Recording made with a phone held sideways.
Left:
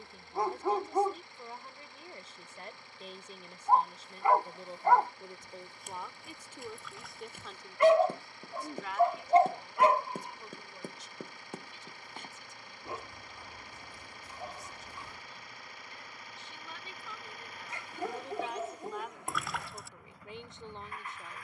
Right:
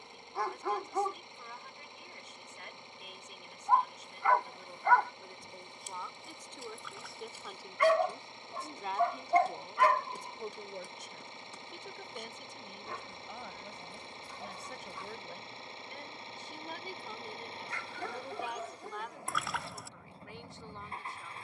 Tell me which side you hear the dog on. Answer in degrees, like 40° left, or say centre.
20° left.